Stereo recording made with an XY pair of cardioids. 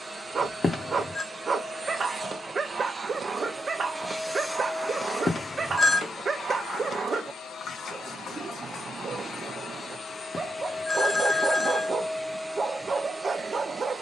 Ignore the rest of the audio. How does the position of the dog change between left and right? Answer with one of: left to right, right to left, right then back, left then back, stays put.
stays put.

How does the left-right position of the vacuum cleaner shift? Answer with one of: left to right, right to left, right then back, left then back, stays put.
left then back.